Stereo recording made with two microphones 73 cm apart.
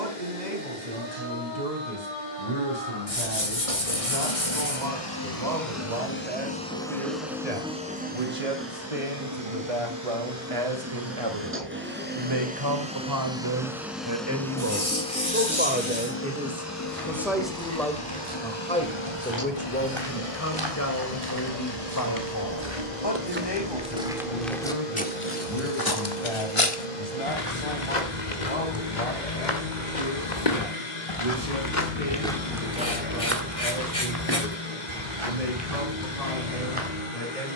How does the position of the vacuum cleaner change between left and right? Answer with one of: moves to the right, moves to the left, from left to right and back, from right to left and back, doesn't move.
from left to right and back.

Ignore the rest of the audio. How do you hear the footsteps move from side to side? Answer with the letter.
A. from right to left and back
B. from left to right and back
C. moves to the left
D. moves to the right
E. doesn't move
A.